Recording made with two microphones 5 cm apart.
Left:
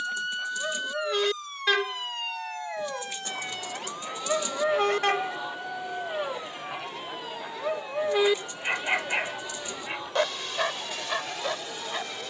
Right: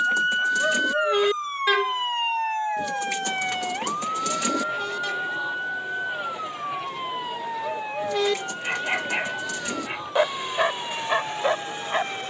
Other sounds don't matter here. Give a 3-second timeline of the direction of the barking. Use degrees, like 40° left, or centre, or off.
10° right, 40° left, 20° left, 20° right.